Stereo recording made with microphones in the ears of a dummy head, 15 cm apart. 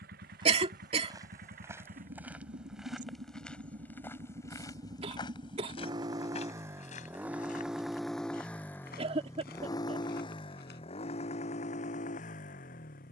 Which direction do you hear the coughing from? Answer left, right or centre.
right.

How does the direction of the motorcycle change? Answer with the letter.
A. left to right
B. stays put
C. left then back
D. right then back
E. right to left
E.